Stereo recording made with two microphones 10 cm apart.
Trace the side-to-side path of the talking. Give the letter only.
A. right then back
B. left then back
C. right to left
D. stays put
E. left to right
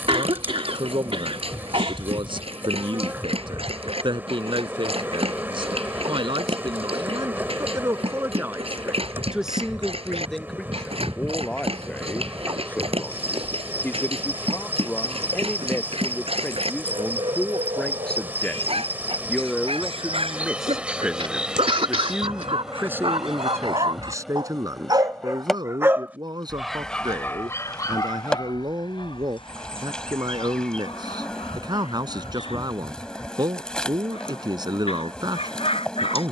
B.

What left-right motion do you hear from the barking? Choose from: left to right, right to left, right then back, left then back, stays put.
right to left.